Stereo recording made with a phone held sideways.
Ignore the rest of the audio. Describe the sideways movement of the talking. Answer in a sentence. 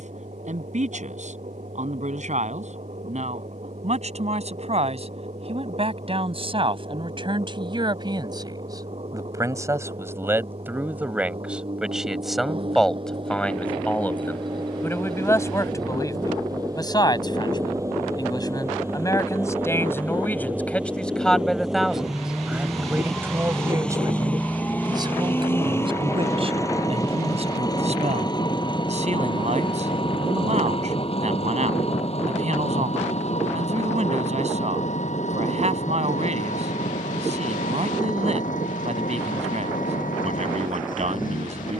In this clip you hear the talking go left and come back.